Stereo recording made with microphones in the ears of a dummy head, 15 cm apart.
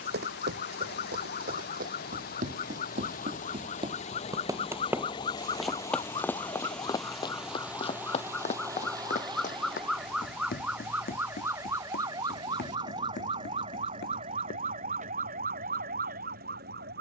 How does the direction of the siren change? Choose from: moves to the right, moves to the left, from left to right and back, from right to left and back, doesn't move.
moves to the right.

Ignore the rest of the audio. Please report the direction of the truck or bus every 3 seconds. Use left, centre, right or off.
left, left, centre, right, right, right.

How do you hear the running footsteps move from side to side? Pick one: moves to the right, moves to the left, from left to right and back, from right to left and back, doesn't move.
moves to the left.